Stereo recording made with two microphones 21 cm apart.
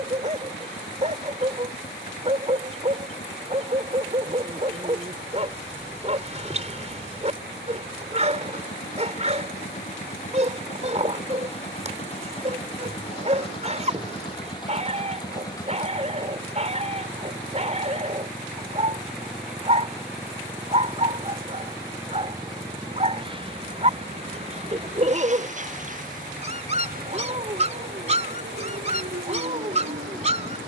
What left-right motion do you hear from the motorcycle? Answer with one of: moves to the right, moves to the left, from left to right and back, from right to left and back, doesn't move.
moves to the right.